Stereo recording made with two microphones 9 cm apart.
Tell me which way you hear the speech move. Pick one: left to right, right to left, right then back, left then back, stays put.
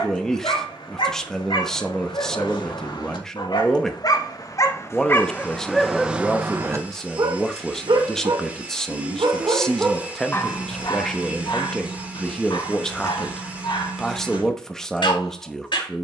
stays put.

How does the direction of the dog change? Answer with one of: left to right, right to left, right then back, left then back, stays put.
right then back.